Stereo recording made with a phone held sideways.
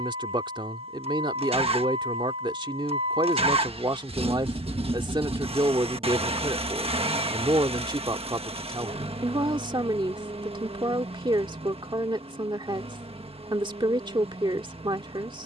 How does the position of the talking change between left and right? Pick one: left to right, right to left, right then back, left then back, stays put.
stays put.